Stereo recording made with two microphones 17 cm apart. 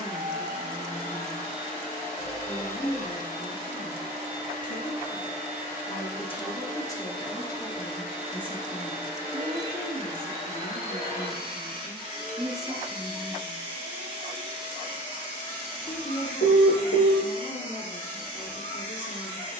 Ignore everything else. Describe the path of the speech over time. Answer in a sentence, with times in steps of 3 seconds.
In this clip you hear the speech on the left from 0 s, in the centre from 6 s, on the right from 9 s, in the centre from 12 s and on the left from 15 s.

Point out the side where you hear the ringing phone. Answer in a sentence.
You can hear the ringing phone on the left.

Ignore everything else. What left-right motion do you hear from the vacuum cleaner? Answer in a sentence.
In this clip you hear the vacuum cleaner stay put.